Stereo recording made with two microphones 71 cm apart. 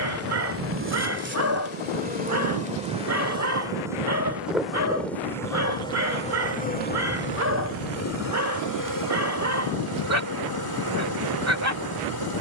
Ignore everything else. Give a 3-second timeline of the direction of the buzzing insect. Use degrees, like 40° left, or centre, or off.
10° right, centre, 20° left, 30° left.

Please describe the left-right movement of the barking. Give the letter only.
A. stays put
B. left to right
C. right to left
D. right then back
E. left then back
A.